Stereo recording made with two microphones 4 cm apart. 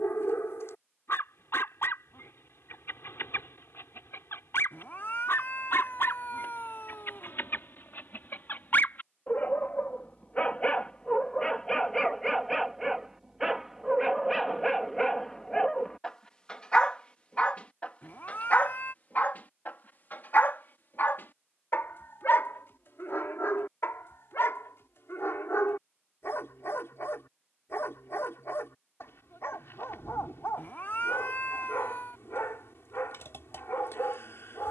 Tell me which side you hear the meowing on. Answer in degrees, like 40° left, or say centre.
50° left.